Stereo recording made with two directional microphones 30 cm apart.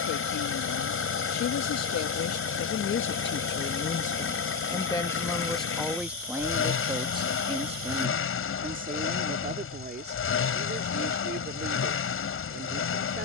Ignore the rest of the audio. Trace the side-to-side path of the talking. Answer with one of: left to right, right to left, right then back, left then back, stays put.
left to right.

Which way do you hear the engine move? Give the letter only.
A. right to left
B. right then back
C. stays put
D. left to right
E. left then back
C.